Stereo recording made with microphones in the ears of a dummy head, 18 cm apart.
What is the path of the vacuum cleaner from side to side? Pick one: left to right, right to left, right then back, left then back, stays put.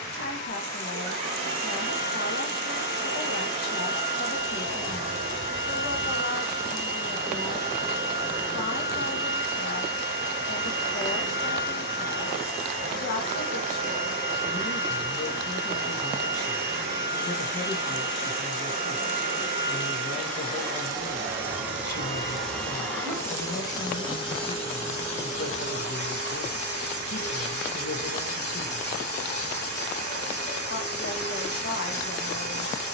right to left.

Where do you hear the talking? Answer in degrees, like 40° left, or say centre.
50° left.